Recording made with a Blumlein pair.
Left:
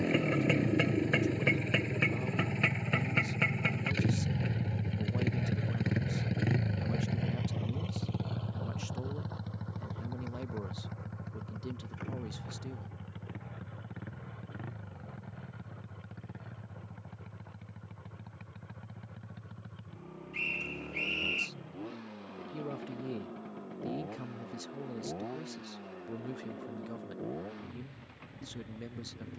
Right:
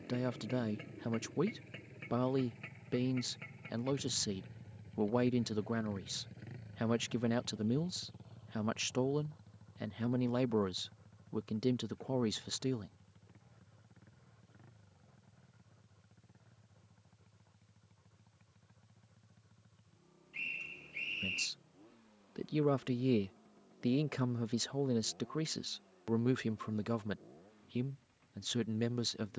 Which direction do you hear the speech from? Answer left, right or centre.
right.